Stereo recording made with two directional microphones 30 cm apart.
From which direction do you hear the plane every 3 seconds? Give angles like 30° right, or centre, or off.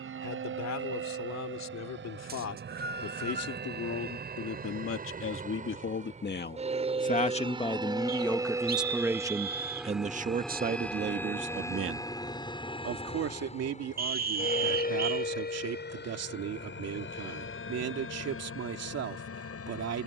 40° right, 30° right, 20° right, centre, 20° left, 40° left, 50° left.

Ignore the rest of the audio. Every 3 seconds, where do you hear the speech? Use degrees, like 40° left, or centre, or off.
70° left, 50° left, 20° left, 30° right, 60° right, 60° right, 60° right.